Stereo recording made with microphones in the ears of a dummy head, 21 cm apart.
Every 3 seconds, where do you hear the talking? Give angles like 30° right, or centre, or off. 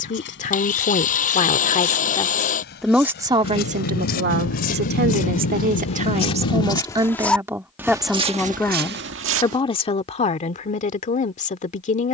30° left, 40° right, 10° right, 30° left.